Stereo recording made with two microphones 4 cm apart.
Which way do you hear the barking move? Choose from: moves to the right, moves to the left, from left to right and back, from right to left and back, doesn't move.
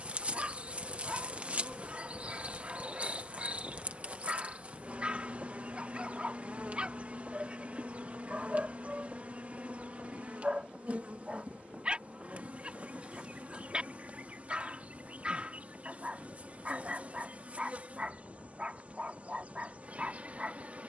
doesn't move.